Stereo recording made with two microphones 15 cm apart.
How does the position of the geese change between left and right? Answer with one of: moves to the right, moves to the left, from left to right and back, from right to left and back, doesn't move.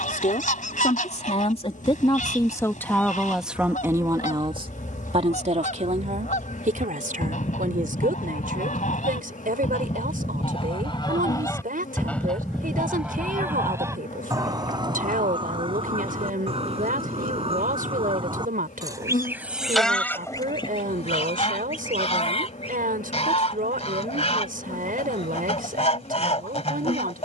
from left to right and back.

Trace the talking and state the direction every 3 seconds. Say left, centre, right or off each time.
left, right, right, right, right, right, right, right, right.